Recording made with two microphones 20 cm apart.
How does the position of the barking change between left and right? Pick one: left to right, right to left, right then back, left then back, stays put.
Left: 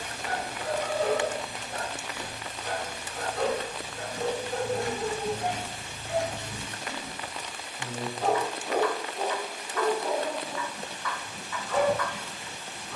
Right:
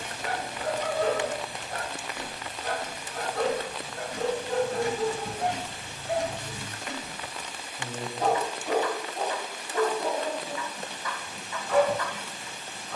stays put.